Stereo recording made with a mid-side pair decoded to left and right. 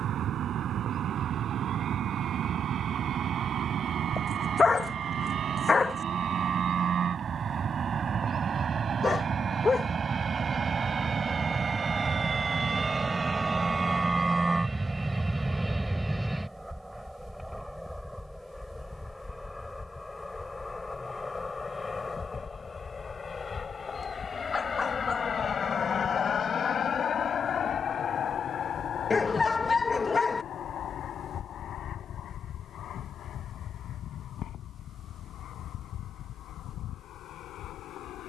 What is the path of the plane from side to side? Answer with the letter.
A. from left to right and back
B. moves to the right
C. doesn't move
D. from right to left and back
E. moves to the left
E.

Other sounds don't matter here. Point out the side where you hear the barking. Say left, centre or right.
left.